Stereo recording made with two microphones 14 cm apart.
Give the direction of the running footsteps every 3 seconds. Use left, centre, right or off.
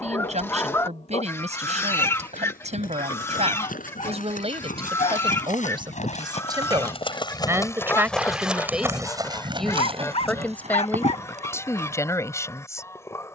left, left, left, right, off.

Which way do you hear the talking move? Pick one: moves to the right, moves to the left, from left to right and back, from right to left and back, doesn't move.
moves to the left.